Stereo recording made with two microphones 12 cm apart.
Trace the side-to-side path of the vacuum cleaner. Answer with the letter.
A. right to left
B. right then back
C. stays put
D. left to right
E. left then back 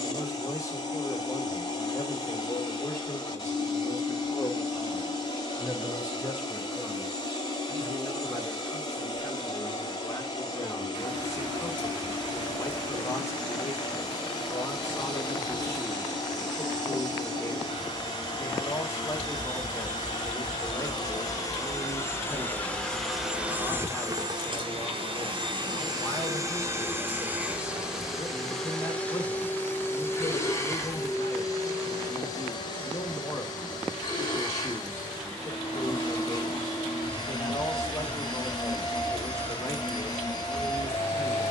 B.